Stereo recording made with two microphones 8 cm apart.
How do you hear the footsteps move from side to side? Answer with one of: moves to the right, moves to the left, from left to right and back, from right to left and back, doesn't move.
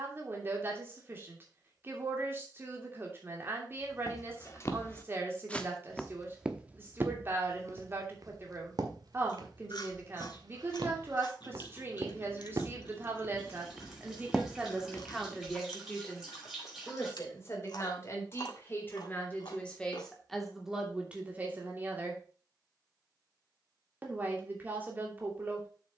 from left to right and back.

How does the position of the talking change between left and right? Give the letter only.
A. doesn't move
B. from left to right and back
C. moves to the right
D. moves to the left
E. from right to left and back
E.